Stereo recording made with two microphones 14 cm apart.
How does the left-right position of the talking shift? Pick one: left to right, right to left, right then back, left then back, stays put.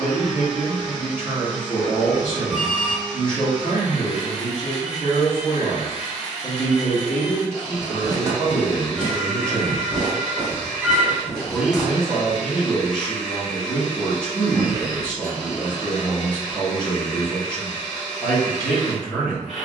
stays put.